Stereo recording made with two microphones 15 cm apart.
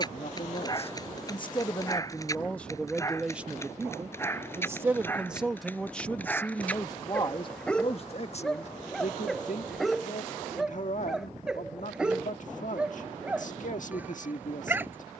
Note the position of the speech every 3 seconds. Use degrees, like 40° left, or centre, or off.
30° left, 10° right, 30° left, 60° left, 60° left.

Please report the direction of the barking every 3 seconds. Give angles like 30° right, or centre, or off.
20° left, 20° left, 10° left, centre, 10° right.